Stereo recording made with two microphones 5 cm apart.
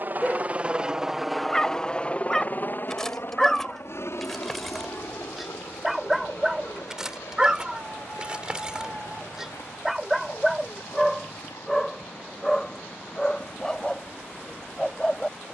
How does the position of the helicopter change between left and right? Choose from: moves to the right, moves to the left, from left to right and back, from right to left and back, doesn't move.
moves to the left.